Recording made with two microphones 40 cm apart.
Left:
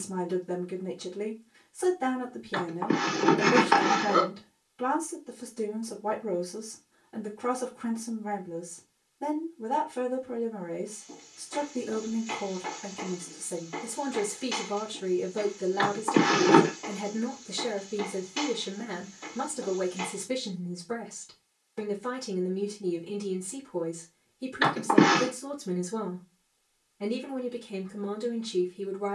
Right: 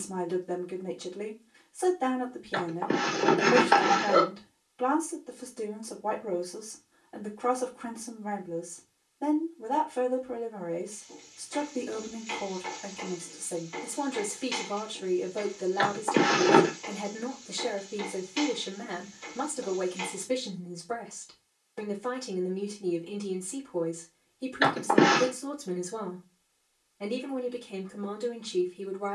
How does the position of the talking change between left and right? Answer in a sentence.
You can hear the talking stay in one place.